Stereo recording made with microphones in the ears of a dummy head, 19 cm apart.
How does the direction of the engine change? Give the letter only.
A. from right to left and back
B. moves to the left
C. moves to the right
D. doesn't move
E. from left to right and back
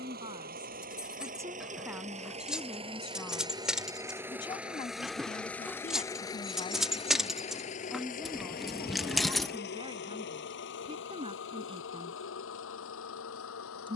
B.